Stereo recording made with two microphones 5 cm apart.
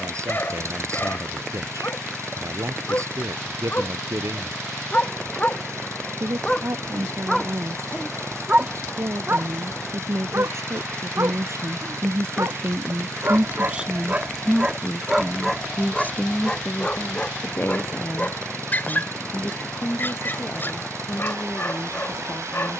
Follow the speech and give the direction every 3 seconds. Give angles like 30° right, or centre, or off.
80° right, 80° right, 80° right, 70° right, 30° right, 30° left, 50° left, 60° left.